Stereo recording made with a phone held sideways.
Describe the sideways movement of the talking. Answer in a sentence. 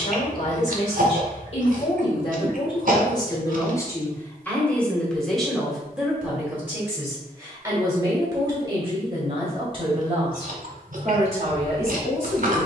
In this clip you hear the talking travel towards the right.